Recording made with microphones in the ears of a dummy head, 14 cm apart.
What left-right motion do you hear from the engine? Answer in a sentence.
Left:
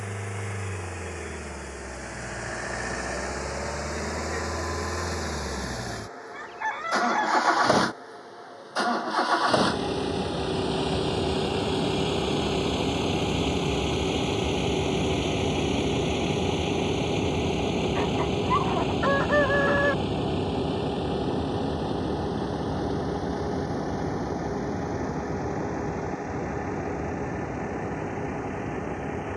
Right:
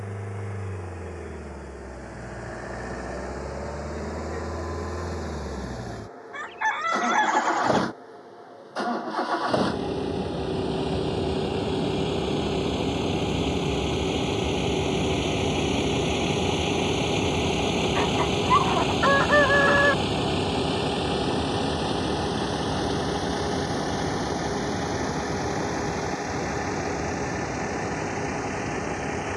In this clip you hear the engine move from left to right.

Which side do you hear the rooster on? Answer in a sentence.
You can hear the rooster on the right.